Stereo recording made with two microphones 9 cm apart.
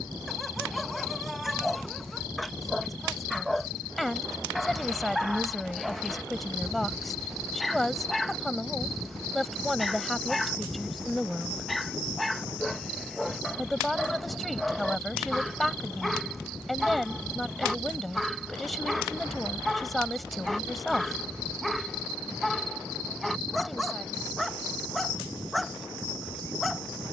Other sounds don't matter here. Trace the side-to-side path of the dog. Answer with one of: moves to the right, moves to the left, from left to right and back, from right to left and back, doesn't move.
doesn't move.